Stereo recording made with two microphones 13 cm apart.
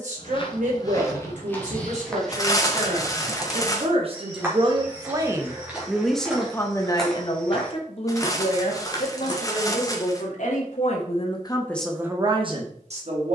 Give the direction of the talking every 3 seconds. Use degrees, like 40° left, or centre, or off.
60° right, 30° right, 30° left, 50° left, 40° right.